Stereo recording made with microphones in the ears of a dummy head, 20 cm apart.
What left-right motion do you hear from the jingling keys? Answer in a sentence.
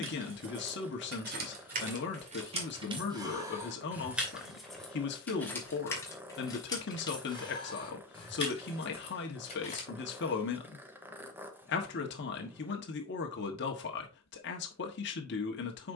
In this clip you hear the jingling keys move from right to left.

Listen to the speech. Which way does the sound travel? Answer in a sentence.
In this clip you hear the speech stay put.